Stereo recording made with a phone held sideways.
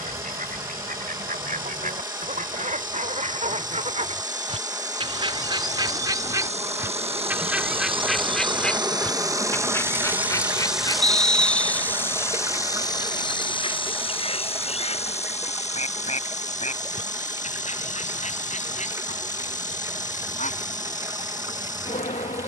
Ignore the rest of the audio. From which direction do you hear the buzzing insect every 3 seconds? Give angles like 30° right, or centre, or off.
70° right, 60° right, 40° right, 10° right, 30° left, 50° left, 60° left, 60° left.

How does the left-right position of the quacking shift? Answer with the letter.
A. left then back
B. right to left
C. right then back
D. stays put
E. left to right
B.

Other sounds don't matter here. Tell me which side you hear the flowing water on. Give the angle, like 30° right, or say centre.
20° right.